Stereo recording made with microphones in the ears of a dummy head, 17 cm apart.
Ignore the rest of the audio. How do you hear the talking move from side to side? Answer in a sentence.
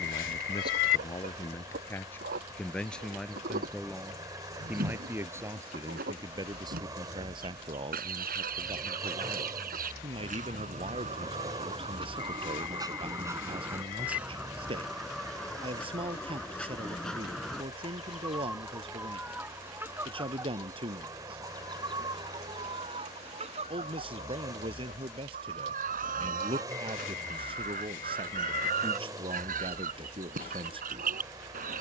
You can hear the talking travel towards the right.